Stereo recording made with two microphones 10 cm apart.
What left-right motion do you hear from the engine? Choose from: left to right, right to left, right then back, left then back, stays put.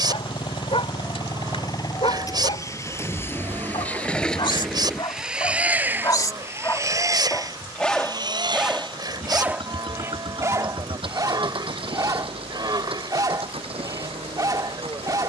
left to right.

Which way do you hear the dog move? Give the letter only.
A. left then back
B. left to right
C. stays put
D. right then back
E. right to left
B.